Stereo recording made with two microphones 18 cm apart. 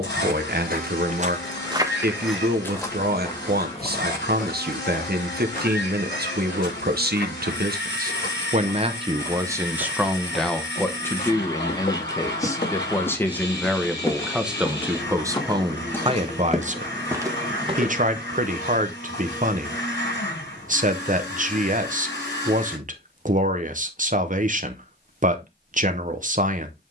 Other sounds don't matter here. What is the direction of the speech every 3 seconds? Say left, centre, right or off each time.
right, right, right, centre, centre, right, right, right, right.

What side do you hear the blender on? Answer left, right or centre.
left.